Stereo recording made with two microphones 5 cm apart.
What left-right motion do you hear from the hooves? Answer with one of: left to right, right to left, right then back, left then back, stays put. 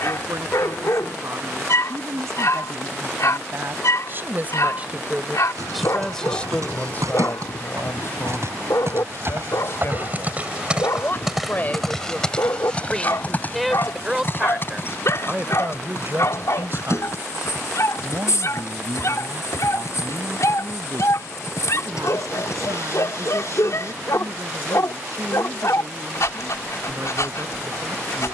right to left.